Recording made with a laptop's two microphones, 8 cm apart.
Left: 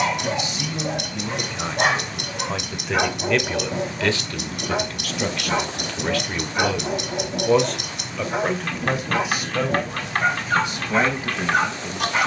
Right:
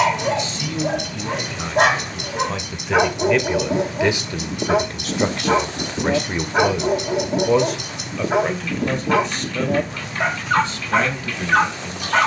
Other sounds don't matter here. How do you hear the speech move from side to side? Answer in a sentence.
In this clip you hear the speech move from left to right and back again.